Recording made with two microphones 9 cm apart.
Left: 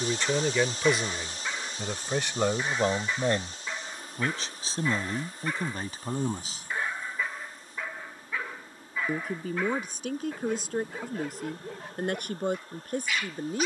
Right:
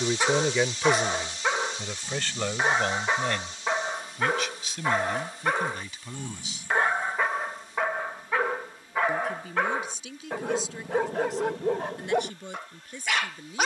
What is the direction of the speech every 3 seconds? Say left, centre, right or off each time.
centre, left, left, left, left.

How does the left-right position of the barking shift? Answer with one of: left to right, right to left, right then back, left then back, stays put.
stays put.